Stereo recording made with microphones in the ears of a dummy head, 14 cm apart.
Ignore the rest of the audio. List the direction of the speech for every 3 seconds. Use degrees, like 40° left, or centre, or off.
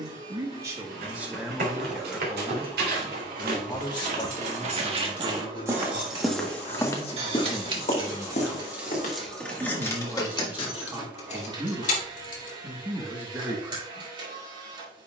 centre, 30° left, 30° left, 10° right, 10° right.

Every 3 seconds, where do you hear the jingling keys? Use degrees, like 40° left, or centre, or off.
off, 60° right, 30° right, 30° left, 60° left.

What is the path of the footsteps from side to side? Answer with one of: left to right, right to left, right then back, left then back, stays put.
right to left.